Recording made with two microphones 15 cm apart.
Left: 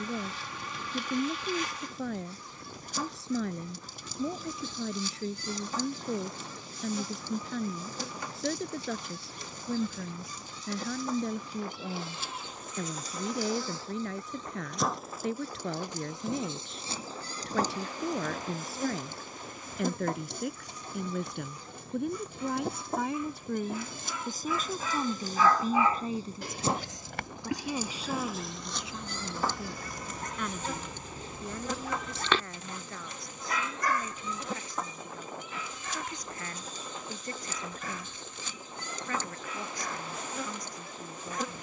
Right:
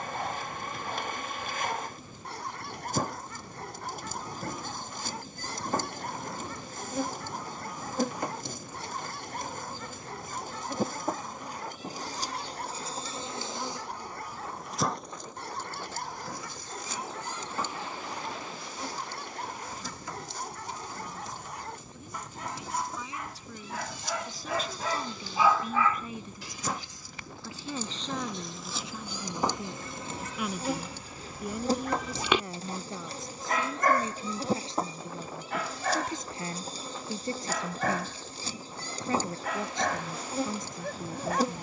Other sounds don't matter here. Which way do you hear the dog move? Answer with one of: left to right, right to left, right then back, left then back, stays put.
left then back.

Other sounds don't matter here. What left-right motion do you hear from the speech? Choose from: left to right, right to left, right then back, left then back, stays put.
left to right.